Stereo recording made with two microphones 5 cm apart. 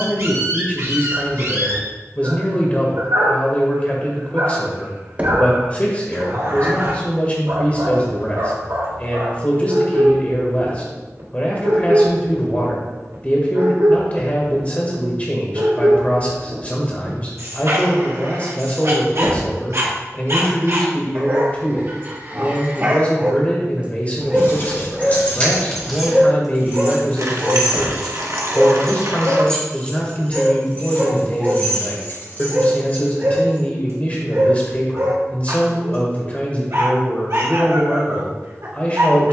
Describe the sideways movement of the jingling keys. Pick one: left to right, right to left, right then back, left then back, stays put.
right then back.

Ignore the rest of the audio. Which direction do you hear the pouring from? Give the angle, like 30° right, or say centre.
70° right.